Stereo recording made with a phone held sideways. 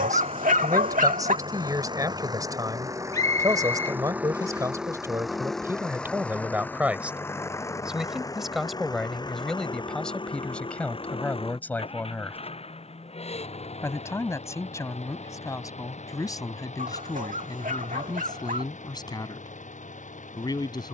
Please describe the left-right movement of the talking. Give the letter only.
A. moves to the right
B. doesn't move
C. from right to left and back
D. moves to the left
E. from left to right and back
D.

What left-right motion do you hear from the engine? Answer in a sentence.
In this clip you hear the engine go from the right side to the left.